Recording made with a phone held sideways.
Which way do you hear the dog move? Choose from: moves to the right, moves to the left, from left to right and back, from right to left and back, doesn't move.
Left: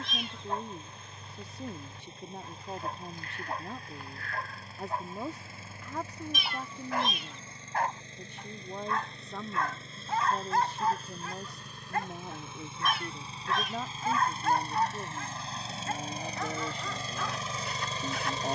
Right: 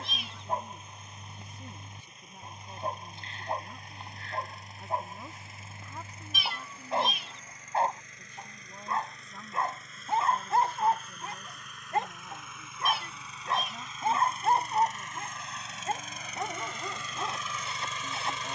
doesn't move.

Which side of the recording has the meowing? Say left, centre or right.
centre.